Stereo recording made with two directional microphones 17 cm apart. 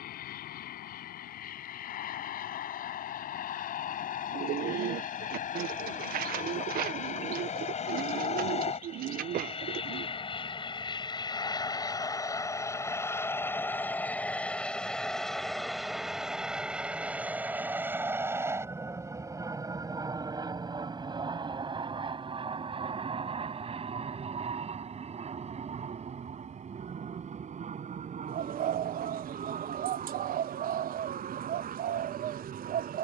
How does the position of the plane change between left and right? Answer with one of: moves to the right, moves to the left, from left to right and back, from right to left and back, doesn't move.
moves to the right.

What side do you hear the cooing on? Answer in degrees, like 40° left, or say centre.
60° right.